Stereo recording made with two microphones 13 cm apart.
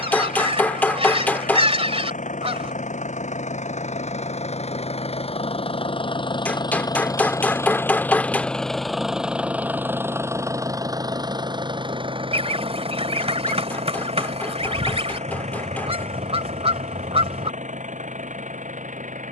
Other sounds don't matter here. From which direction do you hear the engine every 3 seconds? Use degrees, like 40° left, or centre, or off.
70° left, 50° left, 20° left, 20° right, 50° right, 60° right, 60° right.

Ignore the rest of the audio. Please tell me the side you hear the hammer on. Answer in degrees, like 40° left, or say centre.
10° left.